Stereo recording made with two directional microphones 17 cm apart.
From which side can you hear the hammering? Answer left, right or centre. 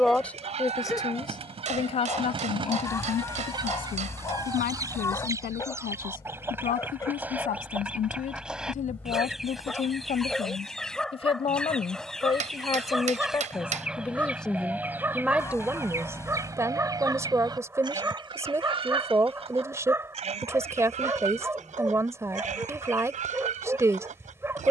right.